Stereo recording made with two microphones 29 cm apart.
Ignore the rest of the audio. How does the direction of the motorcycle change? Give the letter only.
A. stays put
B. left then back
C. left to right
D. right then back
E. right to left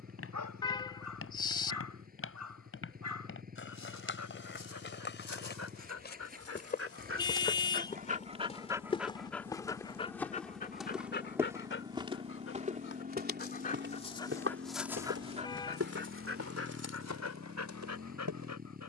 A.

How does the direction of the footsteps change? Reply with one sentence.
You can hear the footsteps move to the right.